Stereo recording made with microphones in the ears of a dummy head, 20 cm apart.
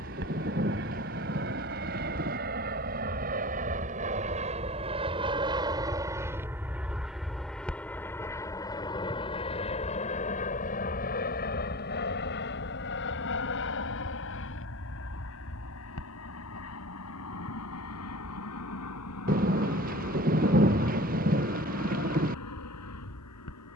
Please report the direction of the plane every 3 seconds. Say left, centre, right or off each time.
right, right, centre, left, left, left, left, left.